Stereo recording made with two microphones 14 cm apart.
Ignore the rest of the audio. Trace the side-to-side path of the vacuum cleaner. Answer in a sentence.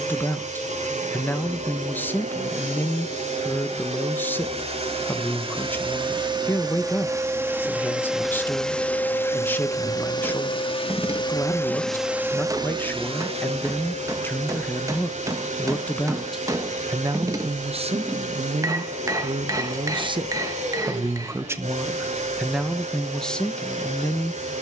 In this clip you hear the vacuum cleaner go left and come back.